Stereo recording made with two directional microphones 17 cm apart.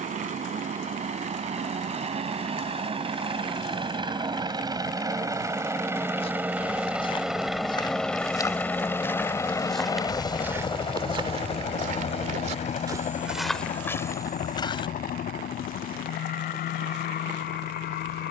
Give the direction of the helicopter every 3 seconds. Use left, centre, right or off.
right, right, centre, left, left, left.